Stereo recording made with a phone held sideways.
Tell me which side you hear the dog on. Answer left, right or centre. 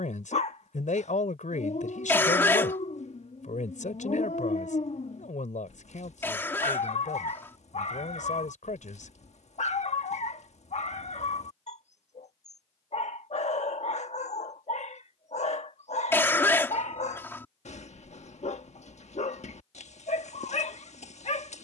left.